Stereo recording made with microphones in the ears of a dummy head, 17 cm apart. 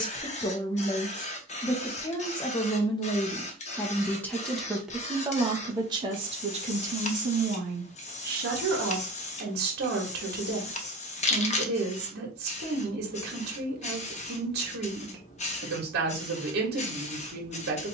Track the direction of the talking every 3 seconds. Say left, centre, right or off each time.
left, centre, right, right, right, right.